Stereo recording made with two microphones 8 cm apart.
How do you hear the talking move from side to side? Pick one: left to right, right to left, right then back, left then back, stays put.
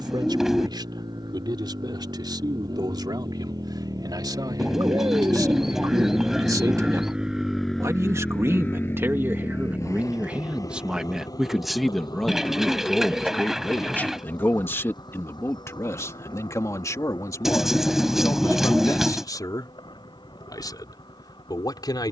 right to left.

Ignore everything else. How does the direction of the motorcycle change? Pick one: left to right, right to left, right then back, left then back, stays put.
right to left.